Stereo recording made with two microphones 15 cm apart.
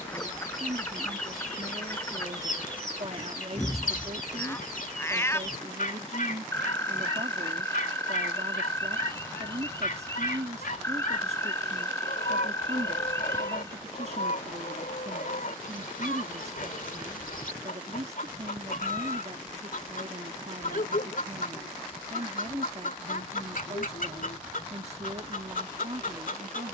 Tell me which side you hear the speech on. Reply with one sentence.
You can hear the speech on the right.